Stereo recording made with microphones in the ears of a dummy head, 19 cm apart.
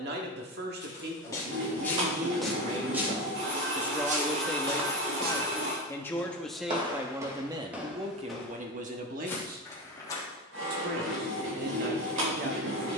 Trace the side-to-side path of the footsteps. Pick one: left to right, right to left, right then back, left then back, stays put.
right then back.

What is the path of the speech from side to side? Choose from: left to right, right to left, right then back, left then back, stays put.
left then back.